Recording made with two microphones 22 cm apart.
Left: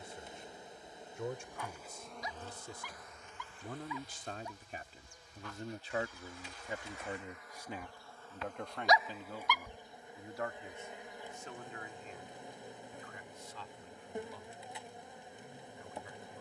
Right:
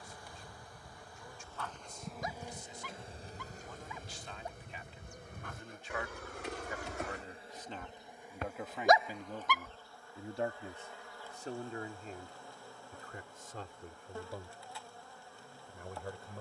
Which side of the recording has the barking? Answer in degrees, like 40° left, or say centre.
50° right.